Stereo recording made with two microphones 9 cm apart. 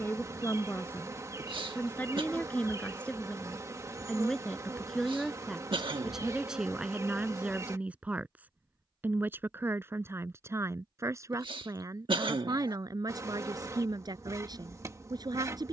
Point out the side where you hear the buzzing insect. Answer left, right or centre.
right.